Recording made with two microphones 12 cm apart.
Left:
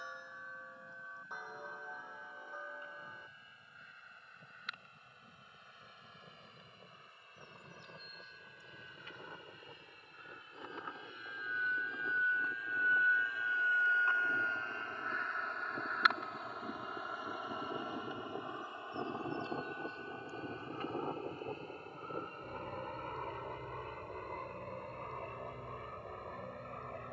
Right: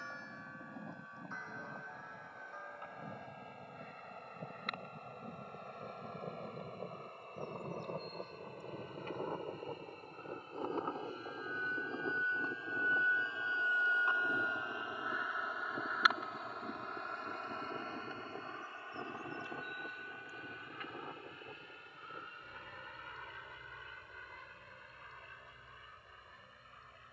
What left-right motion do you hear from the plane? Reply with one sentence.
You can hear the plane move to the left.